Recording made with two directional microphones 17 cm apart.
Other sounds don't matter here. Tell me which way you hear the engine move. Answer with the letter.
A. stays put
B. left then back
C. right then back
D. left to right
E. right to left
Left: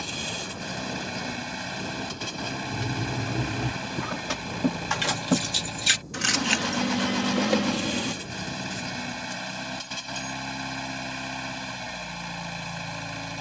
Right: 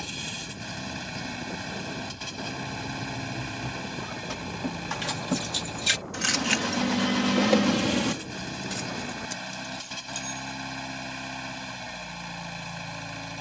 A.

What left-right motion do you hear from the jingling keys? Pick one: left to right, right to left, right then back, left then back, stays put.
left to right.